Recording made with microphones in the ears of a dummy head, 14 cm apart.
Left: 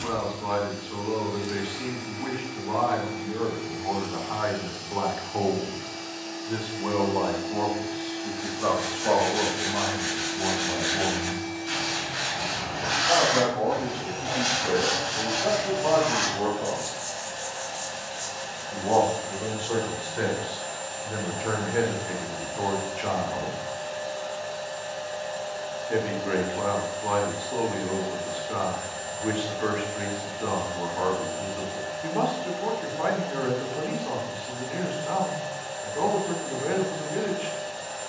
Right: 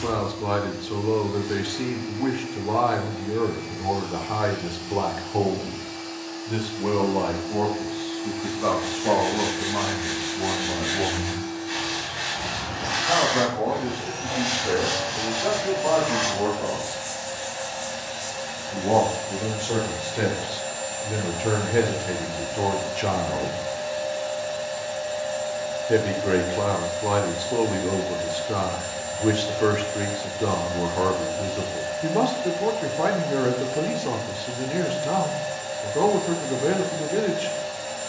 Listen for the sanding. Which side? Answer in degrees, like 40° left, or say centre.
80° left.